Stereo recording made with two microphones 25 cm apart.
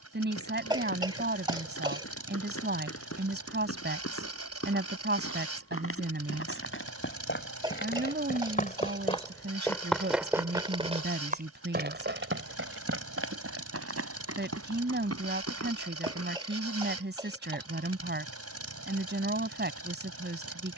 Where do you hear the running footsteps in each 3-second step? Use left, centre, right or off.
left, left, left, centre, right, right, off.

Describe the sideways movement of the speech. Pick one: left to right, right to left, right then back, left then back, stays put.
stays put.